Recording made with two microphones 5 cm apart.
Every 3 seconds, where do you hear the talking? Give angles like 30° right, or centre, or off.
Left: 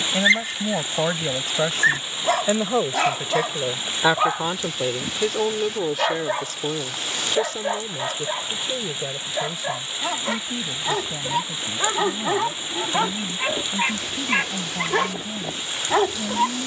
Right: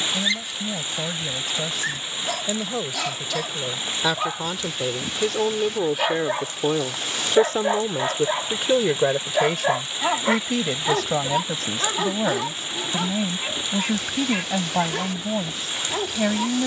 40° left, 10° left, 40° right, 80° right, 80° right, 80° right.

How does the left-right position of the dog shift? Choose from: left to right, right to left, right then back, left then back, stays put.
right then back.